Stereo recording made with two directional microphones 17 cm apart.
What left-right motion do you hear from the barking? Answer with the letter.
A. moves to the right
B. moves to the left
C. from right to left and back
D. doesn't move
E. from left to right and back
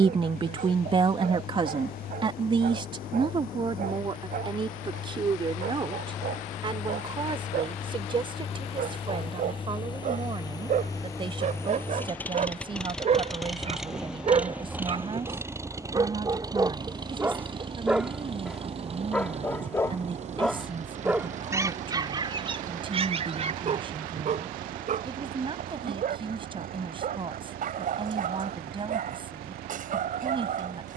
C.